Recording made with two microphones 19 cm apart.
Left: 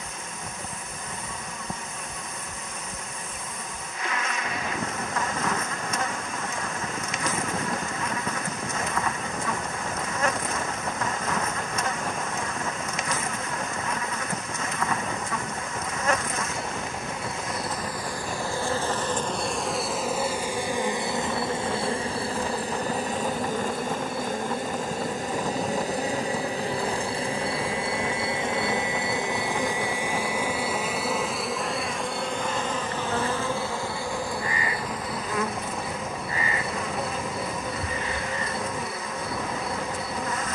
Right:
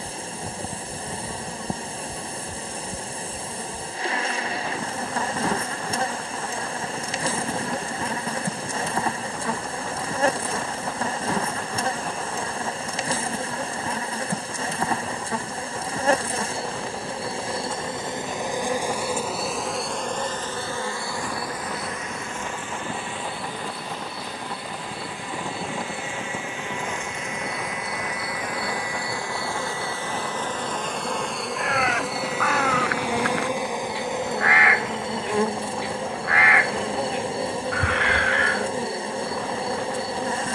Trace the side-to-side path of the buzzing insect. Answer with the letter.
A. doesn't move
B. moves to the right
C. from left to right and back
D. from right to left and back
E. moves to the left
D.